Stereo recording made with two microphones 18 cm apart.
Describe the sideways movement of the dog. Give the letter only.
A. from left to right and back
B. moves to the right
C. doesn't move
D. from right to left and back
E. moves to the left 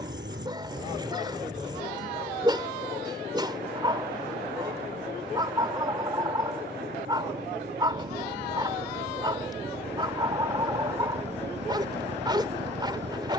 C.